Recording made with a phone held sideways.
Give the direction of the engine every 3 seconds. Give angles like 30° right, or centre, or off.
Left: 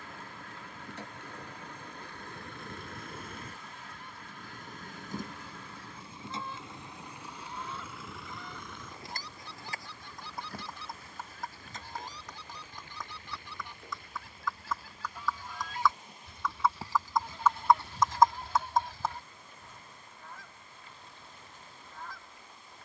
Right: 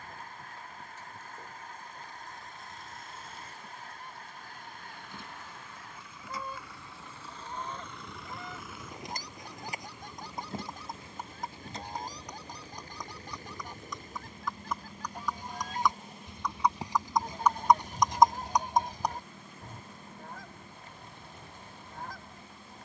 70° left, 50° left, 10° left, 20° right, 40° right, 50° right, 60° right, 60° right.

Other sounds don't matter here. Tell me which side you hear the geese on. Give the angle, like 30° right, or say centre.
40° right.